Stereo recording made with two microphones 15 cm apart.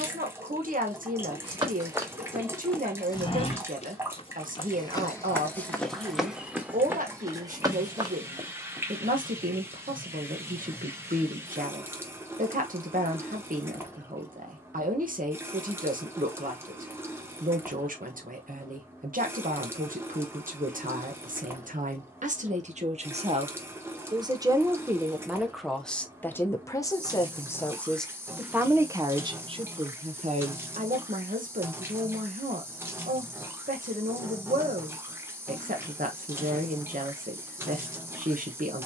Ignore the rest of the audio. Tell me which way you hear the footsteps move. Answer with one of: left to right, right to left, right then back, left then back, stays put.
left then back.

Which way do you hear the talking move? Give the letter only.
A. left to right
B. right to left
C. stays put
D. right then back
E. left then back
E.